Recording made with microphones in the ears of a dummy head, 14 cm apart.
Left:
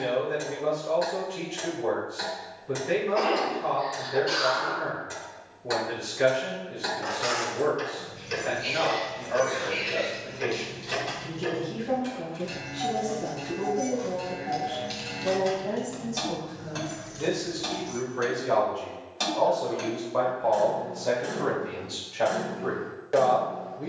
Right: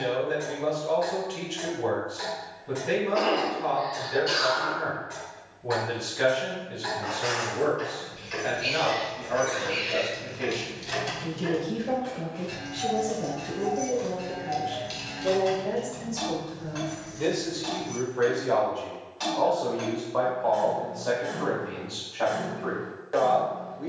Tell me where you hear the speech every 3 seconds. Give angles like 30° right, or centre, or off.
70° right, 70° right, 70° right, 60° right, 50° right, 20° right, centre, 20° left.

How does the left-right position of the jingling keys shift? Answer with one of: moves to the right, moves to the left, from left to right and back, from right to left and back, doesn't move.
from left to right and back.